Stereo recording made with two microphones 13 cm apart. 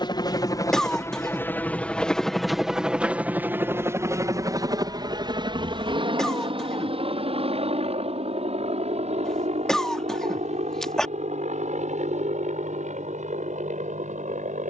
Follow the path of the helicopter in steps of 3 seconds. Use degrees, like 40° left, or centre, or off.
10° left, 20° right, 50° right, 60° right, 60° right.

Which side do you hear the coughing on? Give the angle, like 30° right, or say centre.
centre.